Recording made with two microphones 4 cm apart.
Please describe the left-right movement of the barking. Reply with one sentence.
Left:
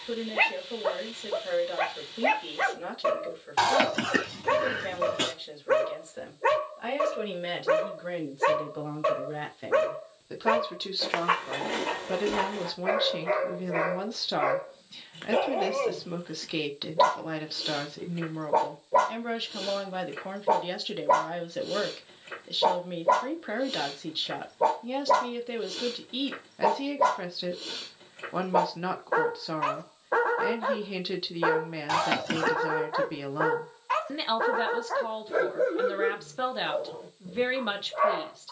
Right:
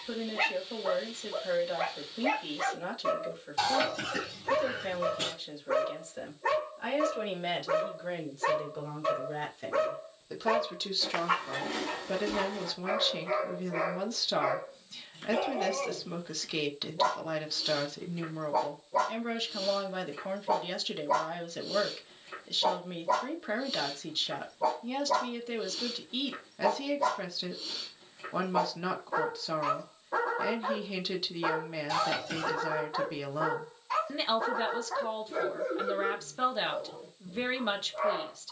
In this clip you hear the barking stay in one place.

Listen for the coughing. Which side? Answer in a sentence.
You can hear the coughing on the left.